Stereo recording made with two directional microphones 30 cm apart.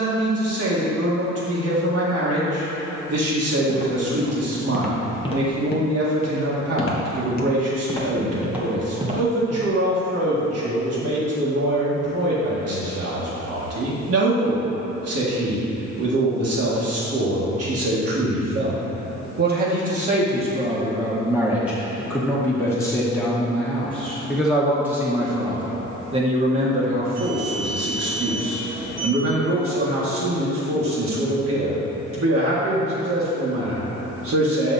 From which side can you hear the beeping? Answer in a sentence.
In this clip you hear the beeping on the right.